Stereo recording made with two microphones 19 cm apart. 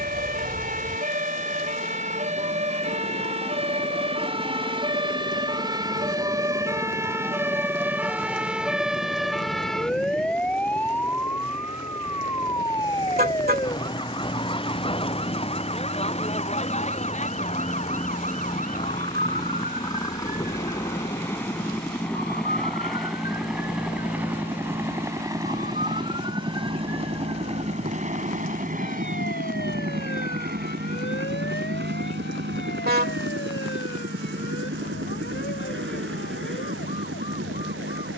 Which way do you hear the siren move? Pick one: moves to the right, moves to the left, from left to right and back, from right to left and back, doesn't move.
moves to the left.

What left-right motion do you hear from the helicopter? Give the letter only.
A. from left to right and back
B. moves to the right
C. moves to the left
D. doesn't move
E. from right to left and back
B.